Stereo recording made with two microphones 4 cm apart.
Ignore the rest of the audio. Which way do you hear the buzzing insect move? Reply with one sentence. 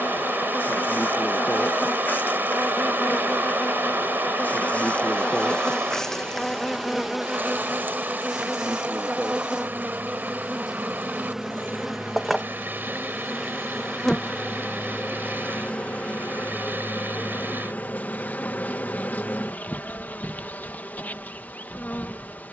In this clip you hear the buzzing insect move from left to right and back again.